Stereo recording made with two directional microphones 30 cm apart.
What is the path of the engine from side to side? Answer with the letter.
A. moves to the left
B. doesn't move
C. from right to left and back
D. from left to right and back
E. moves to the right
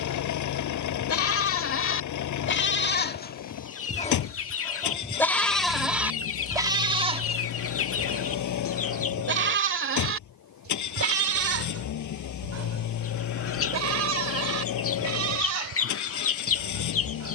B.